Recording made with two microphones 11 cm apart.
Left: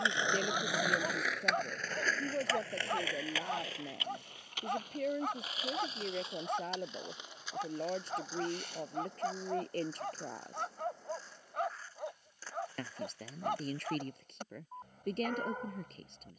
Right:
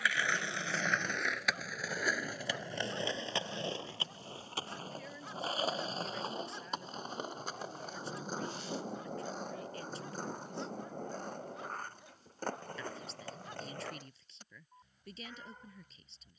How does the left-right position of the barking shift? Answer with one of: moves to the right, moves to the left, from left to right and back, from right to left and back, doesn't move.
doesn't move.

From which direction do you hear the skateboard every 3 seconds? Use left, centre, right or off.
centre, right, right, right, right, off.